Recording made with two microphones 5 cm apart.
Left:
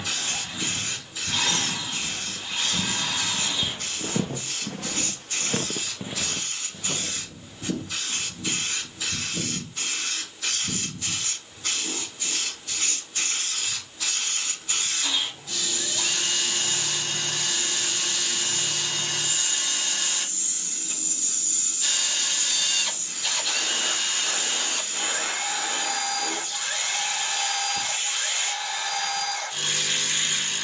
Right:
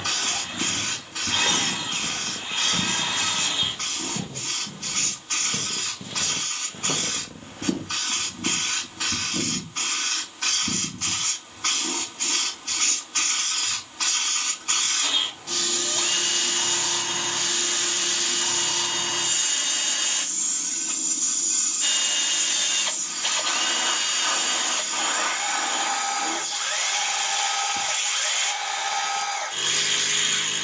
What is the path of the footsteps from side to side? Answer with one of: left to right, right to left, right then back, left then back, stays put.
left then back.